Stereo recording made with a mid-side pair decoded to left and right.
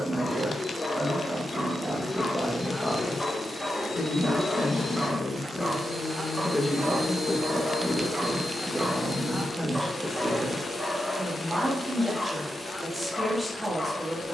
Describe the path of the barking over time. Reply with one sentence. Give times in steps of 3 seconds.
In this clip you hear the barking on the left from 0 s, in the centre from 3 s, on the right from 6 s, in the centre from 9 s and on the left from 12 s.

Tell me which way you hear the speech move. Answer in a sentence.
You can hear the speech move from right to left and back again.